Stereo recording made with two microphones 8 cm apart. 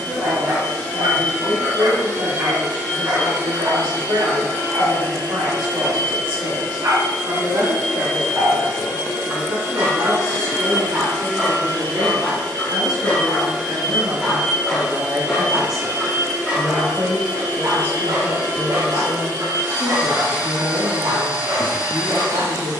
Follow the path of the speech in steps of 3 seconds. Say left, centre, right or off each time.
right, right, right, right, right, centre, left, left.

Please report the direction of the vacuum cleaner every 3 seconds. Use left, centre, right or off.
left, left, left, left, centre, right, right, right.